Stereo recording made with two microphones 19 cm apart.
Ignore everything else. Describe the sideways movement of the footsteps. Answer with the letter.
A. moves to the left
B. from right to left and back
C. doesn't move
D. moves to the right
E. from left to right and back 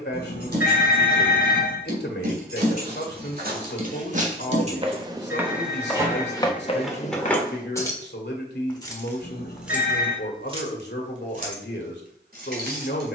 A.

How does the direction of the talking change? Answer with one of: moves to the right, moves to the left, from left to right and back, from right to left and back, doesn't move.
doesn't move.